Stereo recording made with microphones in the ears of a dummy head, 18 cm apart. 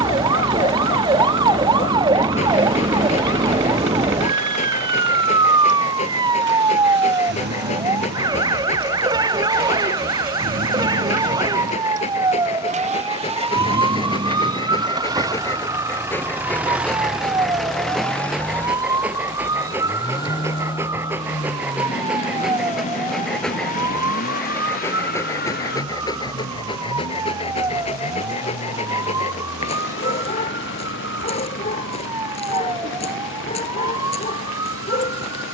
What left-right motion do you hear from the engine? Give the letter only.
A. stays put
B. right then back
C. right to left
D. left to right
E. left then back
C.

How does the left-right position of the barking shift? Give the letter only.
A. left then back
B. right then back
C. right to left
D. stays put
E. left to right
B.